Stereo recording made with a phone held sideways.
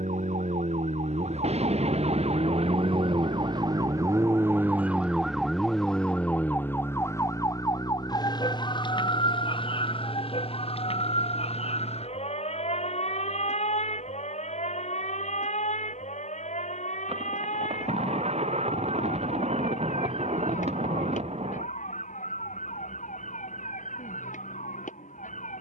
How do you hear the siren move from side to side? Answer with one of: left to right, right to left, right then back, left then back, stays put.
right to left.